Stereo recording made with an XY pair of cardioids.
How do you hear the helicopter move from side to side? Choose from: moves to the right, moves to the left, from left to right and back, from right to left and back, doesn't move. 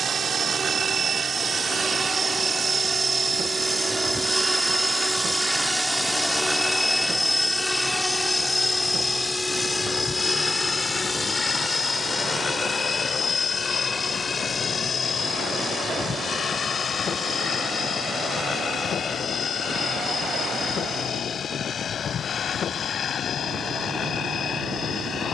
moves to the left.